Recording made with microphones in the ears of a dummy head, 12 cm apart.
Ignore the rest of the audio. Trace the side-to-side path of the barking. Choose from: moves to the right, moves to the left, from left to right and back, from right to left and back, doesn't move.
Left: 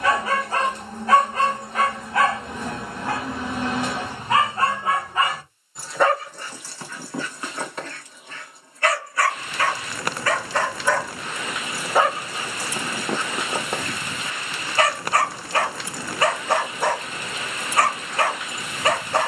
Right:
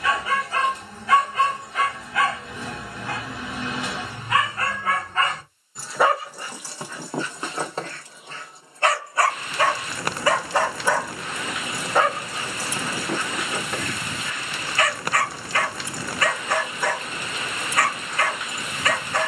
from left to right and back.